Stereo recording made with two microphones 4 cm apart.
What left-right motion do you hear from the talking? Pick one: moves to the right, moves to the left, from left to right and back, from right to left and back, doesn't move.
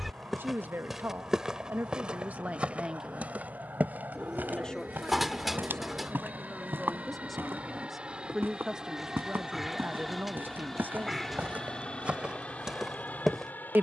from right to left and back.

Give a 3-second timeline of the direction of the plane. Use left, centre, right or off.
right, right, right, centre, left.